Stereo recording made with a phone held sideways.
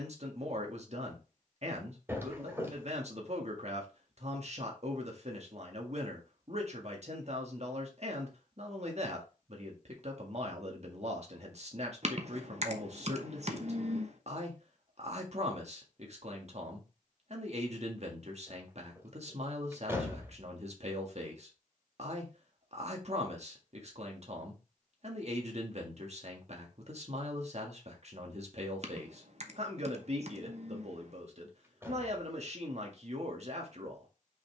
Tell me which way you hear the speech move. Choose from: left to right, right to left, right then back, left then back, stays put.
stays put.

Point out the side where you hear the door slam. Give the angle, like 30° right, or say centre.
20° right.